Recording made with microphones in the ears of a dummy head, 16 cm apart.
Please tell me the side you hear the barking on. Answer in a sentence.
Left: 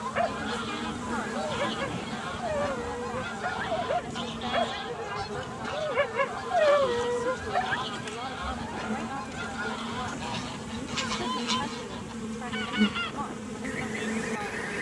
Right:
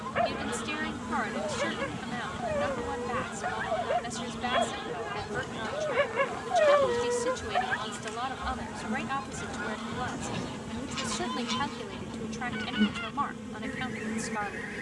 In this clip you hear the barking in the centre.